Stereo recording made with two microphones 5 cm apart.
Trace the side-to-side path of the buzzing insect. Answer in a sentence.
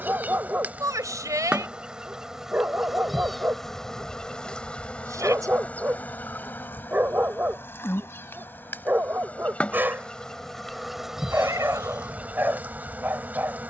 In this clip you hear the buzzing insect move from right to left and back again.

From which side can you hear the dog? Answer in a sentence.
You can hear the dog on the right.